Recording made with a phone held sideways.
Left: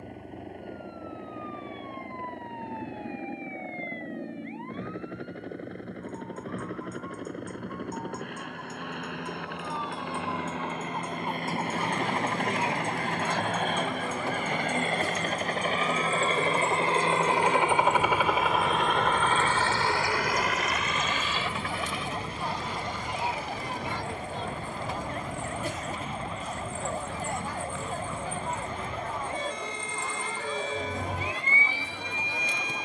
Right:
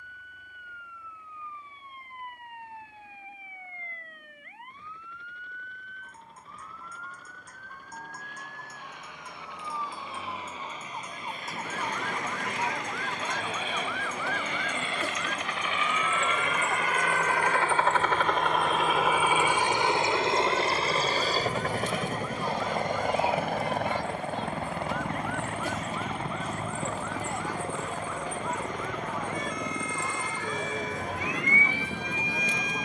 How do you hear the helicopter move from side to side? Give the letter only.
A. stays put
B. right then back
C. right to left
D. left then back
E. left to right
E.